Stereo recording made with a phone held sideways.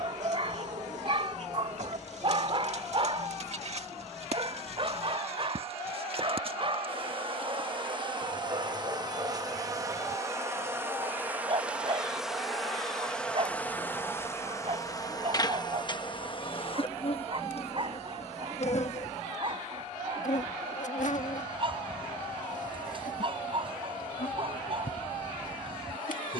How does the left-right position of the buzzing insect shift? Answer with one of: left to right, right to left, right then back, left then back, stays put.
right to left.